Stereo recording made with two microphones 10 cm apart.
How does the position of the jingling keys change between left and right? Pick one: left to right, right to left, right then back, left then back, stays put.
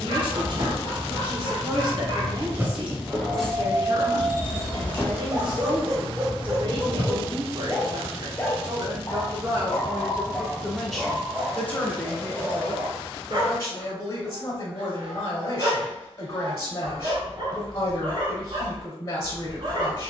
left then back.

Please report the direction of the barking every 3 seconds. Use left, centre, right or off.
right, right, centre, centre, right, right, right.